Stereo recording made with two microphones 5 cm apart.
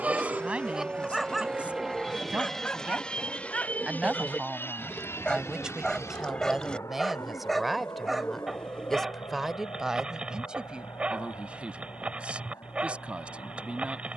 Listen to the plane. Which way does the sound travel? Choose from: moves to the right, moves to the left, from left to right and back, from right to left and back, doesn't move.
moves to the left.